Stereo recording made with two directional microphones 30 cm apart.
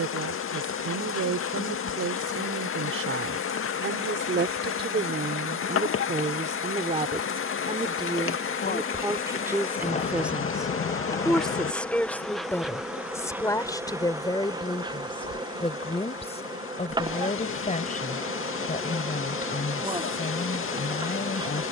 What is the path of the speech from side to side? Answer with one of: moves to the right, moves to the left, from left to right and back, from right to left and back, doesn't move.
moves to the left.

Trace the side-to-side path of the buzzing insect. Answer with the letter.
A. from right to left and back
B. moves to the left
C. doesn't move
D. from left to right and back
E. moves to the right
E.